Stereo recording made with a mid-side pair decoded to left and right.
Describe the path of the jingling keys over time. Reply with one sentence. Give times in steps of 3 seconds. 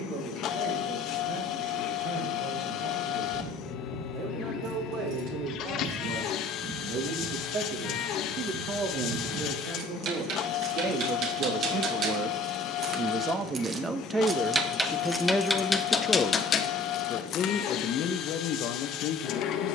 You can hear the jingling keys not at all from 0 s, on the right from 3 s, on the left from 15 s and not at all from 18 s.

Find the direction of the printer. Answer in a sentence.
In this clip you hear the printer on the left.